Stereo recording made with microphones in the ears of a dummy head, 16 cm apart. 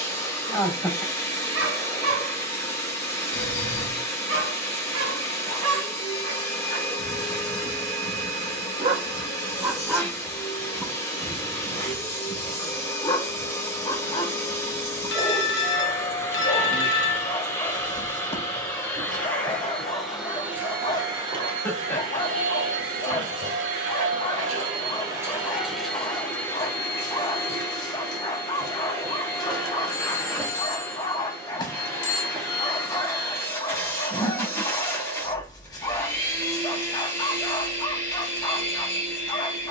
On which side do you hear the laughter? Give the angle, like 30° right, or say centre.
10° left.